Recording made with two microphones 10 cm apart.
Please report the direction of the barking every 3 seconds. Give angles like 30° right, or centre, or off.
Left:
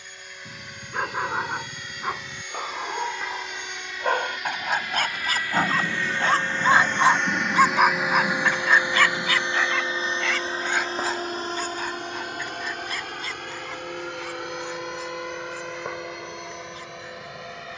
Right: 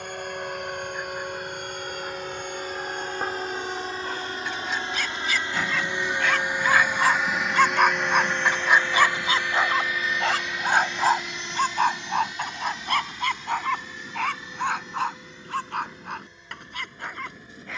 70° left, 50° left, 10° left, 40° right, 60° right, 70° right.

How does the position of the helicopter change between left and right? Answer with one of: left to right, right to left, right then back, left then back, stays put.
right to left.